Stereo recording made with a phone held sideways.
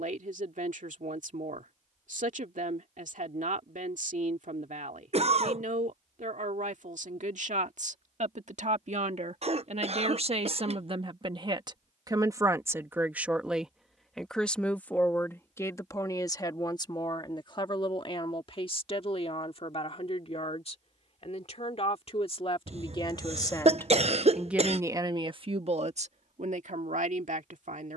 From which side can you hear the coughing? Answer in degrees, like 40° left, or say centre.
50° right.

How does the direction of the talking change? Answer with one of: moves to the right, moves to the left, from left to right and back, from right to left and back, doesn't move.
from right to left and back.